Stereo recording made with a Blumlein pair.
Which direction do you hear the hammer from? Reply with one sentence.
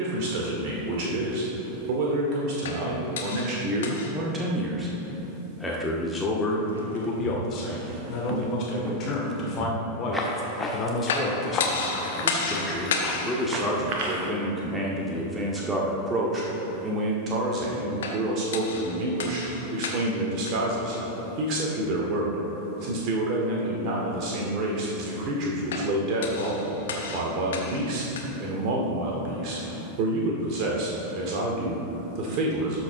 In this clip you hear the hammer on the left.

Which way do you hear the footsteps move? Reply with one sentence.
You can hear the footsteps go left and come back.